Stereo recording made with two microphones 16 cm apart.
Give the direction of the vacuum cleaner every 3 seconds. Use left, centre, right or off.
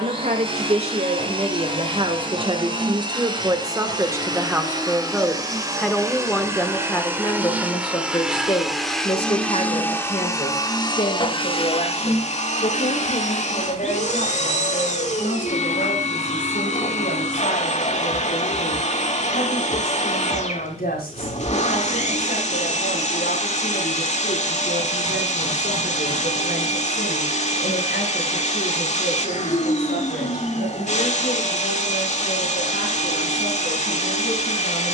right, right, centre, left, left, left, left, left, left, left, left, left.